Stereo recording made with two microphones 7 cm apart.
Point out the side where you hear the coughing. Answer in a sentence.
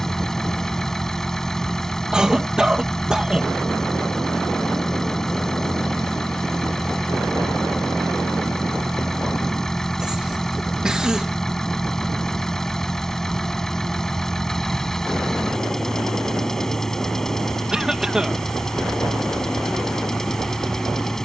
In this clip you hear the coughing in the centre.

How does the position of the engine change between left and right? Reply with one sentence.
In this clip you hear the engine stay in one place.